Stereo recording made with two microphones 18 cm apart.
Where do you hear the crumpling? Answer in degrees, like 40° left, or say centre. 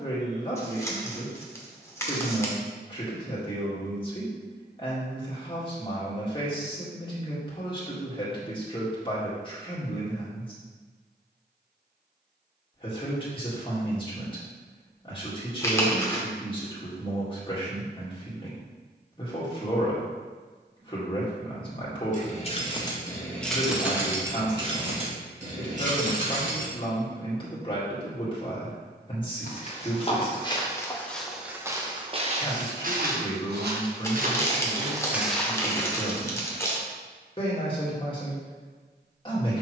20° left.